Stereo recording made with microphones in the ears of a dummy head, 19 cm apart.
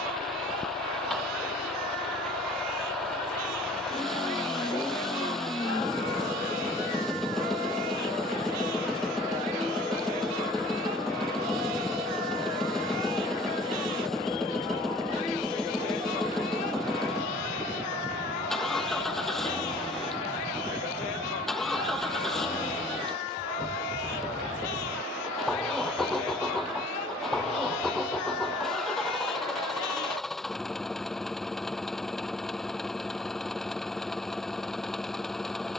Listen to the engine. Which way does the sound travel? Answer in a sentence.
In this clip you hear the engine stay put.